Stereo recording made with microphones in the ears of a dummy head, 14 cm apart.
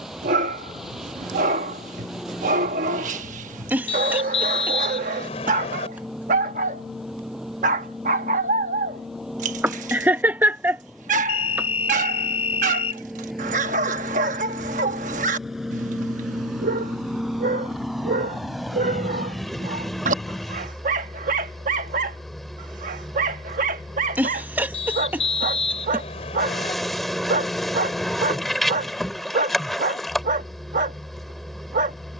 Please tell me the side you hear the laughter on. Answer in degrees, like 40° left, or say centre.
10° right.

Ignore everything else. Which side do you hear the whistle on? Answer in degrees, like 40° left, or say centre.
40° left.